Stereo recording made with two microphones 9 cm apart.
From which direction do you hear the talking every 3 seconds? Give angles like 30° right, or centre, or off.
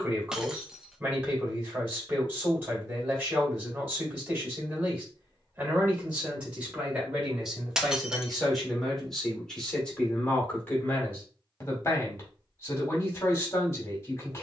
20° right, 20° right, 10° right, 10° left, 30° left.